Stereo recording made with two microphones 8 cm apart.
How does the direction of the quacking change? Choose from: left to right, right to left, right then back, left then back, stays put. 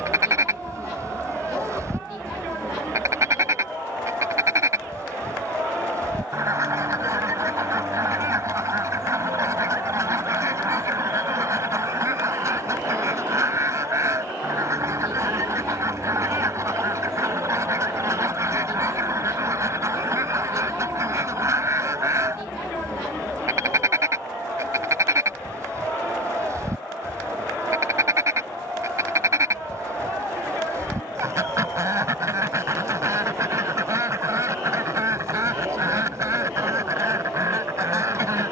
stays put.